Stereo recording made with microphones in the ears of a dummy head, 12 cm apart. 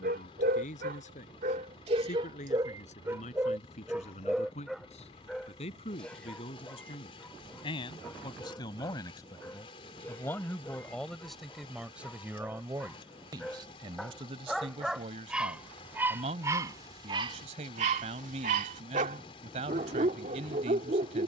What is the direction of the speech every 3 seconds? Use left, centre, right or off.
left, left, left, centre, right, right, right.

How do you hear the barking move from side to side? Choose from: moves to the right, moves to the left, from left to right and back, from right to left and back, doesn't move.
from right to left and back.